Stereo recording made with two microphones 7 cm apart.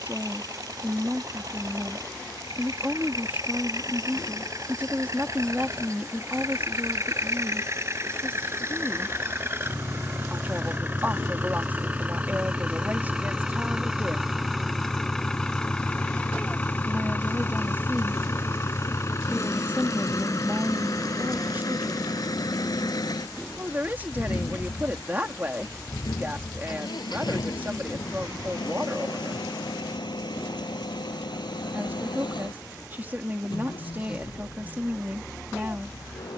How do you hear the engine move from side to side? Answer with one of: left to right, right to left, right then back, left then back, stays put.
right to left.